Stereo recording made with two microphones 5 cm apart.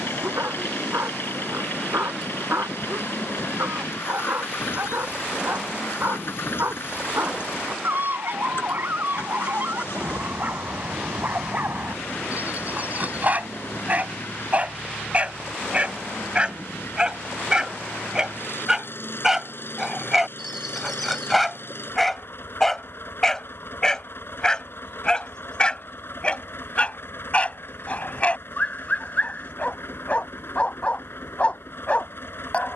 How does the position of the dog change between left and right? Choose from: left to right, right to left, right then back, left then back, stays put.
right to left.